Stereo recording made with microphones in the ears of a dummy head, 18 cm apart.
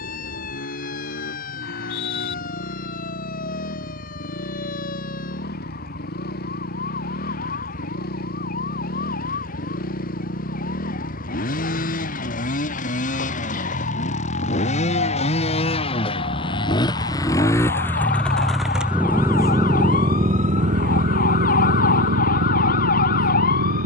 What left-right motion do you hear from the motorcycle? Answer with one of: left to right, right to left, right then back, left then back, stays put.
left to right.